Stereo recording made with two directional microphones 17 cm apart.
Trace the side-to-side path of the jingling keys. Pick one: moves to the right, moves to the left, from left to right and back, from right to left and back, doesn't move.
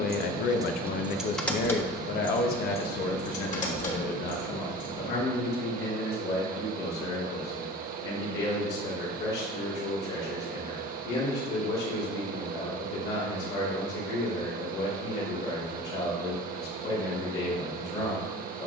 moves to the left.